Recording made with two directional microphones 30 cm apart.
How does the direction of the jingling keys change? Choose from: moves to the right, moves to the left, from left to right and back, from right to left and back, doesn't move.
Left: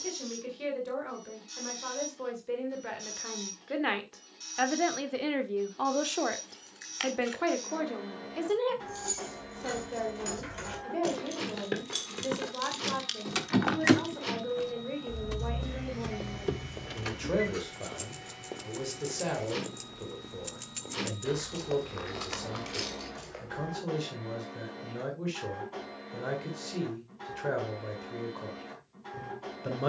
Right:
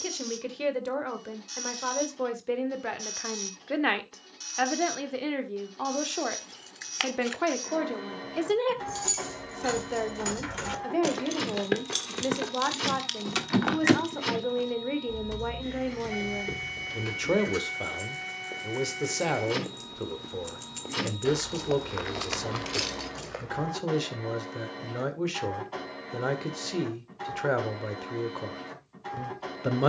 from right to left and back.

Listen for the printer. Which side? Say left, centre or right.
right.